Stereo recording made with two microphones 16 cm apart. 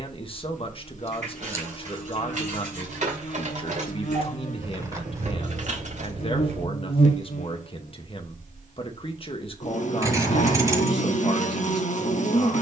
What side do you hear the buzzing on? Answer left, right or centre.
left.